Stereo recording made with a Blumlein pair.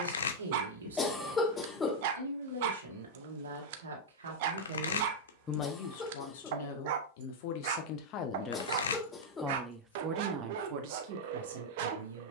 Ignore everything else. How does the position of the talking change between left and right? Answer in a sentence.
In this clip you hear the talking go left and come back.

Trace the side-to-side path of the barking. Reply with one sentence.
You can hear the barking stay in one place.